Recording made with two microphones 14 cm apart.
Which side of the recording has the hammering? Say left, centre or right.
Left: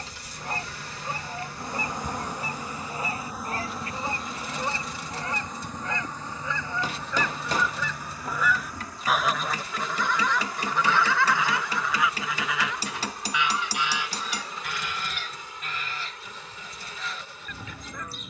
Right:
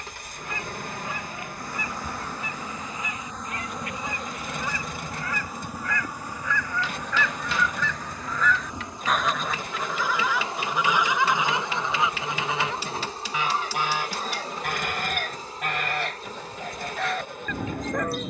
left.